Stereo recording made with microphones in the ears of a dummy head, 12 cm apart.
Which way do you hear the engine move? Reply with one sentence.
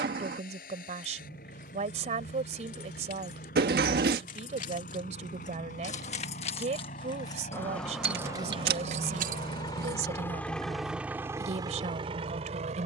In this clip you hear the engine travel towards the right.